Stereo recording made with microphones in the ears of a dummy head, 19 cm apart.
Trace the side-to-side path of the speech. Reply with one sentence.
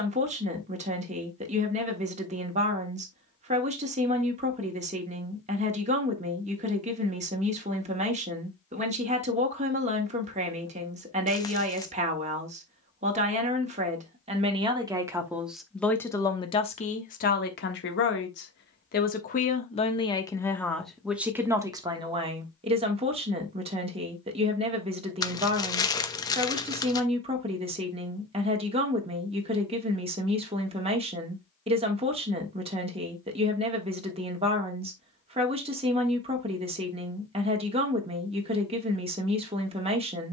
In this clip you hear the speech go left and come back.